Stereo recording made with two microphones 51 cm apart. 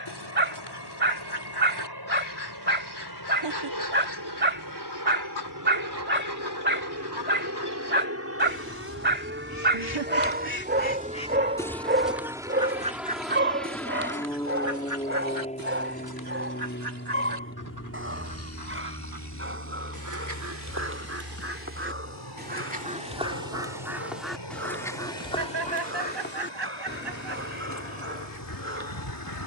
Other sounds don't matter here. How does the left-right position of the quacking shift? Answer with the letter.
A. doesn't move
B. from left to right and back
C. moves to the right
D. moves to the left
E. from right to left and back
B.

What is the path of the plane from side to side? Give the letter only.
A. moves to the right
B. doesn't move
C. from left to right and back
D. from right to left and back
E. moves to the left
E.